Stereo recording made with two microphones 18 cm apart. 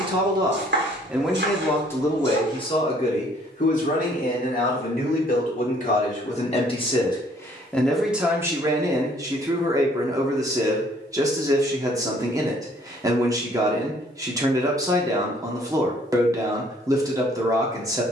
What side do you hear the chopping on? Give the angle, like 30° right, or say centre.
70° right.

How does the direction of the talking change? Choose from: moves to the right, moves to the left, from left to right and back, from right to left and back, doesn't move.
from right to left and back.